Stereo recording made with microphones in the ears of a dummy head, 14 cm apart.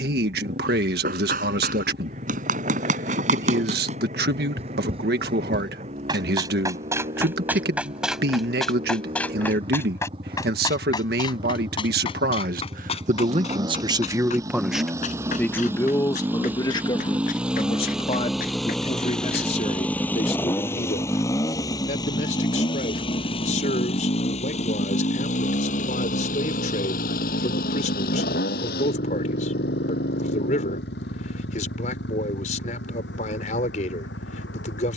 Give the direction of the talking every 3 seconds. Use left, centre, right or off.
right, right, right, right, right, left, left, left, left, left, left, left.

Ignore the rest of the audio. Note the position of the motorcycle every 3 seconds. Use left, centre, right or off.
right, right, right, right, right, centre, centre, left, left, left, left, left.